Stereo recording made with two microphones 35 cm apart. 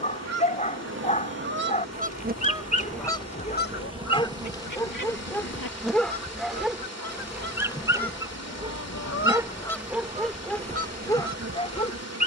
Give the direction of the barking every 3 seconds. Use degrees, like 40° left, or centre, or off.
20° left, 10° left, centre, centre.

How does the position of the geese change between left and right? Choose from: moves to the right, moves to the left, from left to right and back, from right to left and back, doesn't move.
from right to left and back.